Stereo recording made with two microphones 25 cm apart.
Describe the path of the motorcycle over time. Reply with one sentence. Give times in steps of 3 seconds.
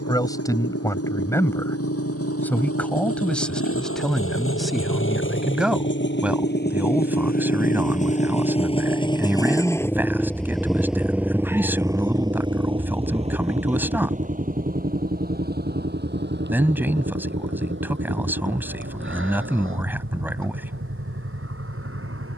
You can hear the motorcycle on the left from 0 s, in the centre from 9 s and on the right from 12 s.